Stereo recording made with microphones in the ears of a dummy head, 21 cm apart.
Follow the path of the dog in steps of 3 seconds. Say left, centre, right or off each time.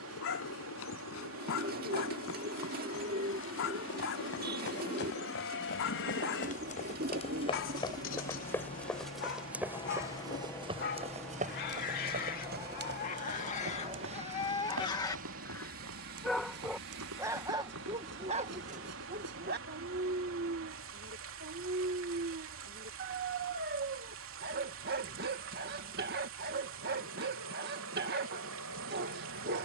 left, left, left, left, left, centre, right, right, right, right.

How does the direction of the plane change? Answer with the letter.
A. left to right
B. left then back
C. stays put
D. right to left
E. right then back
A.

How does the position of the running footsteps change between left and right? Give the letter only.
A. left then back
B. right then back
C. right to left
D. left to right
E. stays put
D.